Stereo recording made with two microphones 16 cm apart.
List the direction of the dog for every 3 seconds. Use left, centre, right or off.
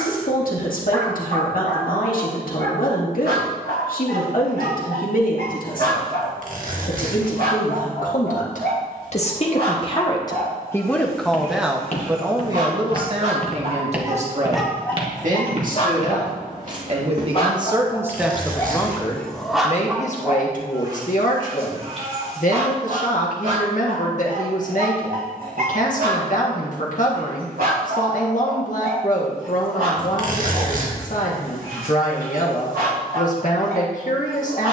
right, right, right, right, right, left, centre, right, right, right, right, right.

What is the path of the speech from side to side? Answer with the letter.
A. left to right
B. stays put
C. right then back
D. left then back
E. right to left
C.